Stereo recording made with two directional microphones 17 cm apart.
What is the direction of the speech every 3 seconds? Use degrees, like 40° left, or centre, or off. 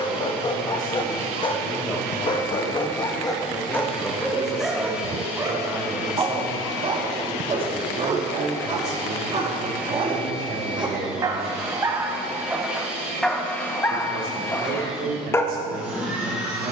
20° left, centre, 30° right, 50° right, 60° right, 60° right.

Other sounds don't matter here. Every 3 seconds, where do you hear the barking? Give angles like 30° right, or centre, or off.
30° left, centre, 40° right, 30° right, centre, 10° left.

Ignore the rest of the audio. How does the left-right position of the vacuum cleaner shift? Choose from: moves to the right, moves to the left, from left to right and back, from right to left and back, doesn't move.
doesn't move.